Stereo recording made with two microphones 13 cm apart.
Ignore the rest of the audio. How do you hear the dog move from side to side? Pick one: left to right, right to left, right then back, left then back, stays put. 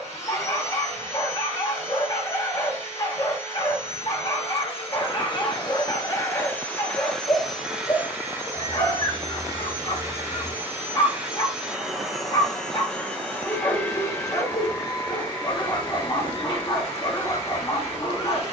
stays put.